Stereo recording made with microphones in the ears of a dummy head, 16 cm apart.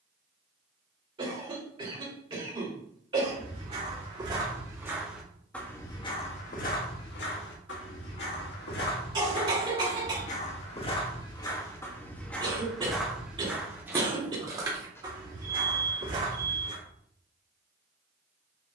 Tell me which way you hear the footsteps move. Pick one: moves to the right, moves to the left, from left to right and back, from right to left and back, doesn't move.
from right to left and back.